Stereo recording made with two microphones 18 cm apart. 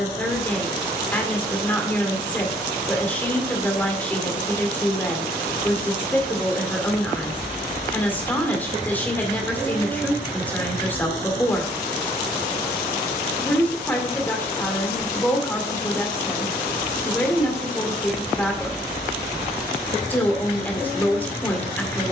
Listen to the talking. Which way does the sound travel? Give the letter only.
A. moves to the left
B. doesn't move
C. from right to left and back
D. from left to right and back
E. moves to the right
B.